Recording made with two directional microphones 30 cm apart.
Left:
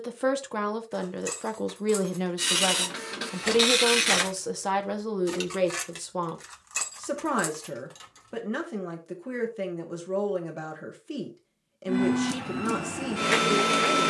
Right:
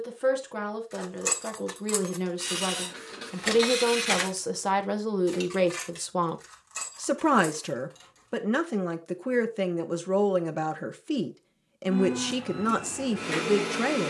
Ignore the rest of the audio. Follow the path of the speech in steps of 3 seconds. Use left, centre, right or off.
left, centre, right, right, right.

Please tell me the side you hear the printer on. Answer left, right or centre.
left.